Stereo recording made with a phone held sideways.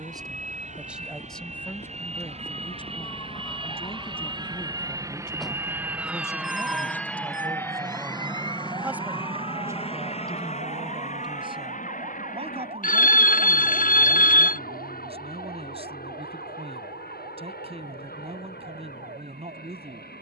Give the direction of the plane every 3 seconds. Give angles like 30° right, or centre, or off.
60° right, 30° right, 10° left, 40° left, 60° left, 70° left, 70° left.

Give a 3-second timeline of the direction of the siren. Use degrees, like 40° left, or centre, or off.
50° left, 10° left, 20° right, 40° right, 50° right, 60° right, 60° right.